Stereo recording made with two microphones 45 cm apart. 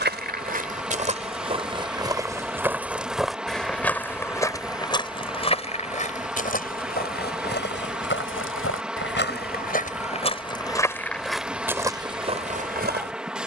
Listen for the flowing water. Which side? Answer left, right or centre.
centre.